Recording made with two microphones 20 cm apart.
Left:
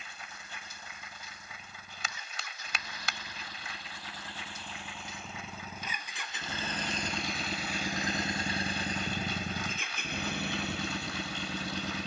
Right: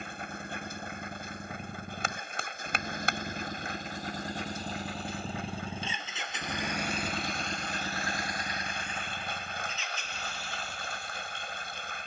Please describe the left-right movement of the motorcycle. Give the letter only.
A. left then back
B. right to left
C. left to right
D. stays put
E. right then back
B.